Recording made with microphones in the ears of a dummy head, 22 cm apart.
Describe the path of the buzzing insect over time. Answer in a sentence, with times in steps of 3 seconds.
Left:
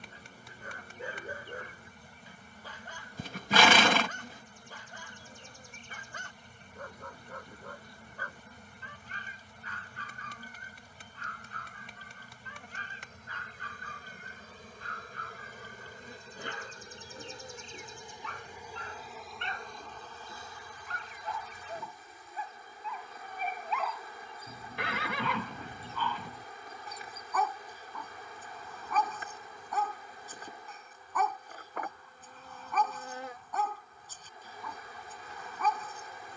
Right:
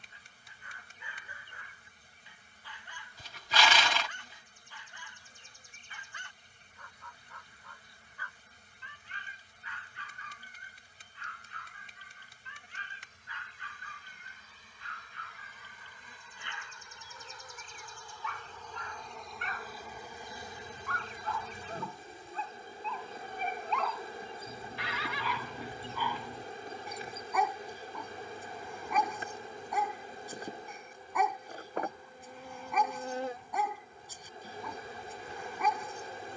You can hear the buzzing insect on the left from 0 s, in the centre from 18 s and on the right from 21 s.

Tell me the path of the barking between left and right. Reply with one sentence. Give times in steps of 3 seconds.
You can hear the barking on the left from 0 s and in the centre from 21 s.